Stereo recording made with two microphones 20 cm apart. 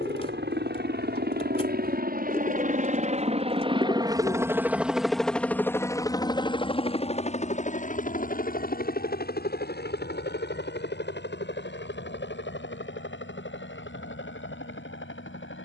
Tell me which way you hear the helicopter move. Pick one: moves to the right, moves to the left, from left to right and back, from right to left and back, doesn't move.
moves to the left.